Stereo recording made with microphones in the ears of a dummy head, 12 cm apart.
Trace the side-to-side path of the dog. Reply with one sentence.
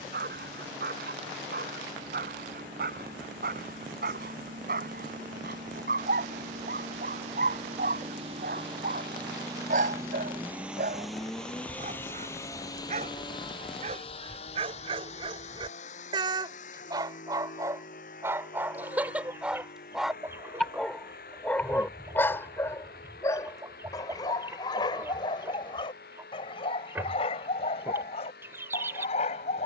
In this clip you hear the dog move from right to left.